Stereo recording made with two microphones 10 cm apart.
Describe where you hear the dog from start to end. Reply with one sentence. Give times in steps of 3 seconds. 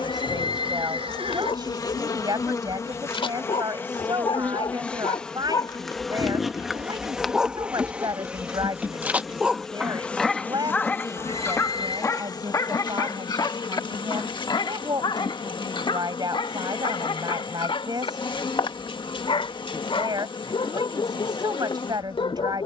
You can hear the dog on the left from 0 s, in the centre from 6 s and on the left from 12 s.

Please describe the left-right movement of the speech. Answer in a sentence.
In this clip you hear the speech stay put.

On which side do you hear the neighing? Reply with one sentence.
In this clip you hear the neighing on the right.